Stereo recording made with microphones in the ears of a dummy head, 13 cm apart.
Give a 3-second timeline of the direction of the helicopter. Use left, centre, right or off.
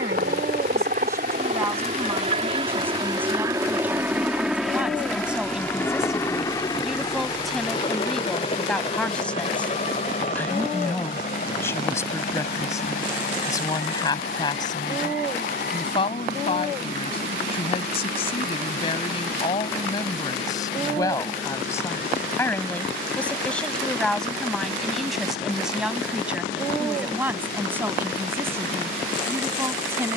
right, centre, left, left, left, left, left, left, left, left.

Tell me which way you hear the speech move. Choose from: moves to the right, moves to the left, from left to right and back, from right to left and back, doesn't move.
from right to left and back.